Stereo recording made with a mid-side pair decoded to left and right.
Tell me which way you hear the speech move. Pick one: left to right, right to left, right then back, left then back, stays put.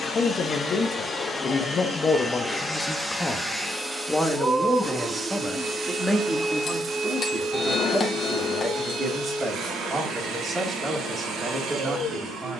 left to right.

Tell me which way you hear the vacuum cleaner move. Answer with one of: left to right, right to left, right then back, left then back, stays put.
left to right.